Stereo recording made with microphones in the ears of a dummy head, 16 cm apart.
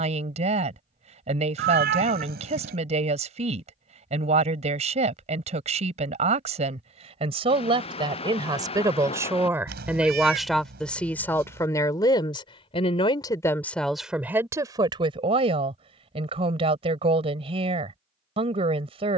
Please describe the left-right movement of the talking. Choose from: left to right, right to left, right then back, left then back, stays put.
left then back.